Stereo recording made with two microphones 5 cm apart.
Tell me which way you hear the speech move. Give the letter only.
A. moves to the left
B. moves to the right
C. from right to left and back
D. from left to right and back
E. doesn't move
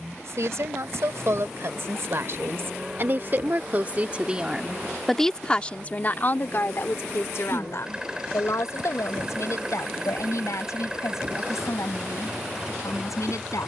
A.